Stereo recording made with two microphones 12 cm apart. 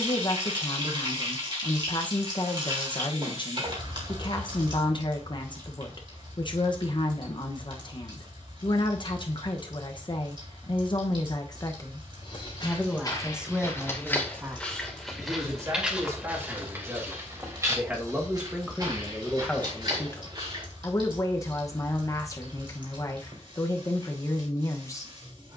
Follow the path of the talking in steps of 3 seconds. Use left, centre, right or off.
left, left, left, left, centre, right, centre, left, left.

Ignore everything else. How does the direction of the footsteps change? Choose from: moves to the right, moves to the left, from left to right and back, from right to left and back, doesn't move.
moves to the right.